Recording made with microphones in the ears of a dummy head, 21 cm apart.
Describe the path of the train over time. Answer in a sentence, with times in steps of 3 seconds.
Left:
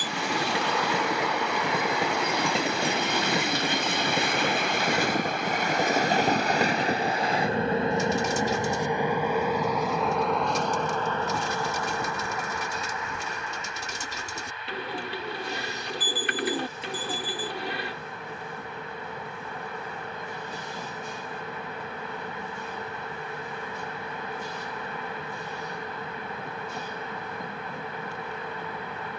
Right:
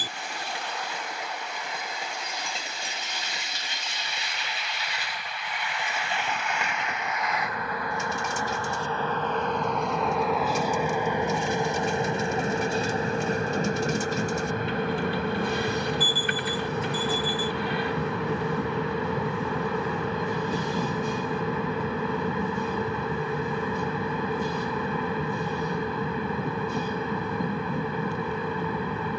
In this clip you hear the train on the left from 0 s, in the centre from 9 s and on the right from 12 s.